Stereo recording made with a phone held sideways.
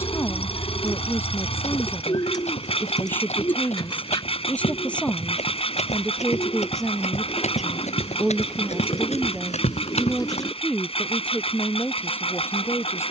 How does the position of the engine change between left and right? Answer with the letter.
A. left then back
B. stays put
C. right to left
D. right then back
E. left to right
B.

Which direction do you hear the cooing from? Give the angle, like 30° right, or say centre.
30° left.